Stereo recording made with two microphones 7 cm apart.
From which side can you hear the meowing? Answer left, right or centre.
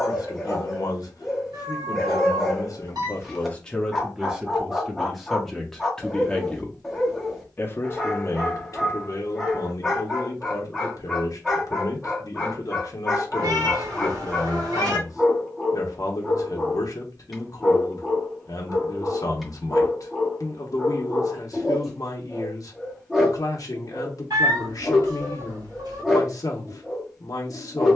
right.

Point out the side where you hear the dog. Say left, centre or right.
centre.